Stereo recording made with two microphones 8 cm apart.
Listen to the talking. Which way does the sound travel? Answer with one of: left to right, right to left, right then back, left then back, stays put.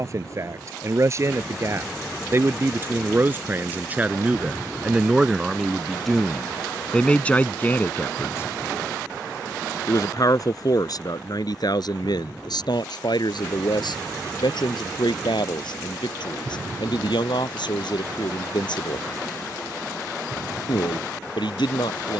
right to left.